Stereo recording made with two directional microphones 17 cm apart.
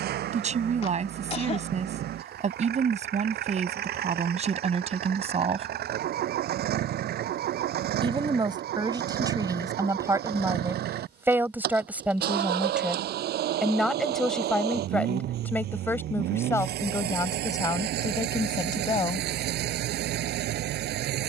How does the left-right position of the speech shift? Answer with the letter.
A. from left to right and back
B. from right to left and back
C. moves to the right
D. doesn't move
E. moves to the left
E.